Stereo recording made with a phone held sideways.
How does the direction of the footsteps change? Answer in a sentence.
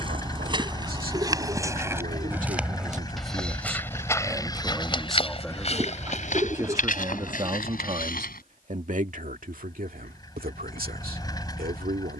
You can hear the footsteps go from the right side to the left.